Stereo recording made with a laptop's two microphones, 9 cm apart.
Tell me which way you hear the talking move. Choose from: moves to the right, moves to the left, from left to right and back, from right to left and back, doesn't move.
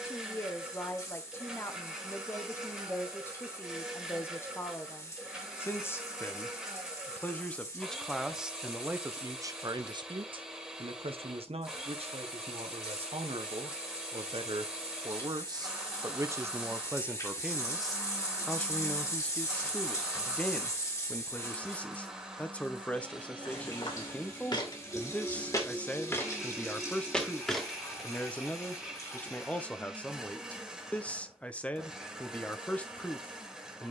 from left to right and back.